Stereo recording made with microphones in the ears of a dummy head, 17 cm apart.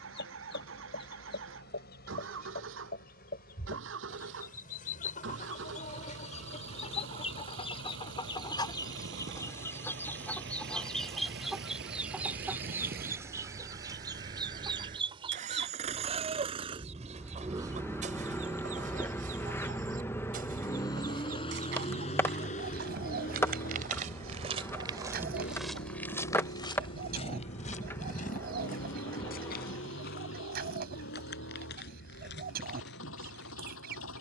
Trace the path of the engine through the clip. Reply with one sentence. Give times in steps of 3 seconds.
You can hear the engine on the right from 0 s, in the centre from 18 s and on the left from 21 s.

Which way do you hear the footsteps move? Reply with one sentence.
In this clip you hear the footsteps travel towards the left.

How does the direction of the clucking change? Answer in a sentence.
You can hear the clucking go from the left side to the right.